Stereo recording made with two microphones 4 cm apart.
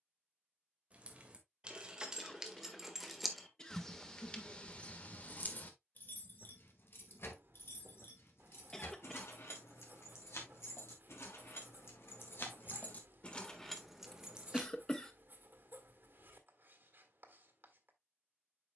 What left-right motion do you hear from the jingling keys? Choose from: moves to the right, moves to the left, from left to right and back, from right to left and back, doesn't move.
from right to left and back.